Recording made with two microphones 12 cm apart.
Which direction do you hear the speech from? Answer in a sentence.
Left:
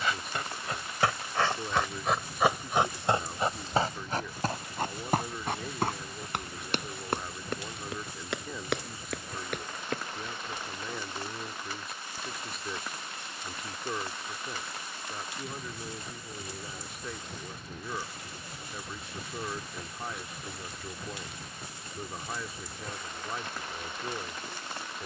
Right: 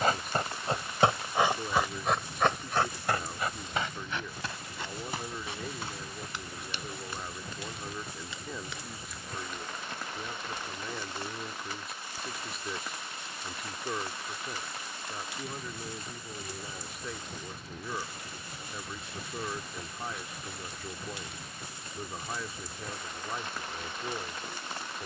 In this clip you hear the speech in the centre.